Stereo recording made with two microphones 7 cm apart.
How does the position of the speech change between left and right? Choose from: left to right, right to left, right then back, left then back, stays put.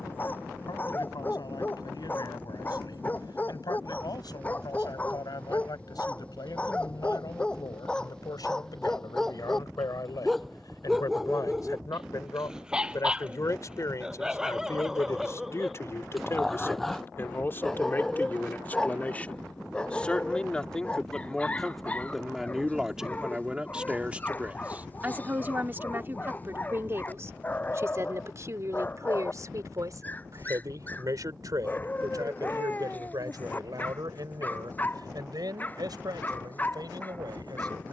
left to right.